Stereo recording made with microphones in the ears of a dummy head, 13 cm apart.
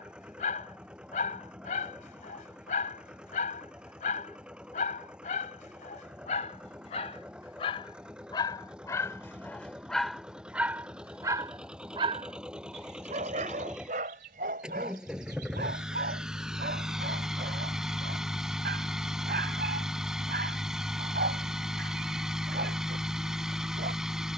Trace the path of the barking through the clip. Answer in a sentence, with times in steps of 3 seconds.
You can hear the barking on the left from 0 s, in the centre from 9 s and on the right from 12 s.